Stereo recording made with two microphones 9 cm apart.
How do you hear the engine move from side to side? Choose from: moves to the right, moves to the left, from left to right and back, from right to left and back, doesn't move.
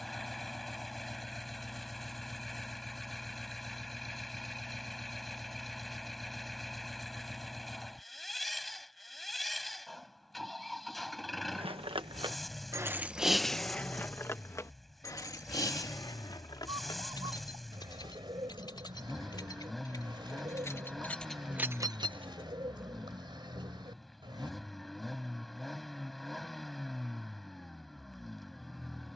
doesn't move.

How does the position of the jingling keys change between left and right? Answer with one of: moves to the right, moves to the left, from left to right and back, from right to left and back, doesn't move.
from right to left and back.